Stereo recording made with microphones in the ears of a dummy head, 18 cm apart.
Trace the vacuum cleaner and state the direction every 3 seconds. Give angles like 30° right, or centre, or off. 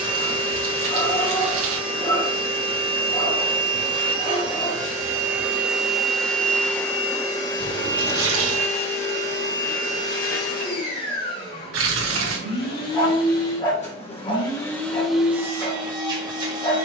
30° right, 20° right, 20° left, 50° left, 40° left, 20° right.